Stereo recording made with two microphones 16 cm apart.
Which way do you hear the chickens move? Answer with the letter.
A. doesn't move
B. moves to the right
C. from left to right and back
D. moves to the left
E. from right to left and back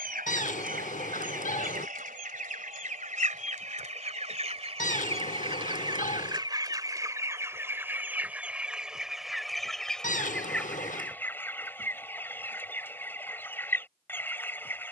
D.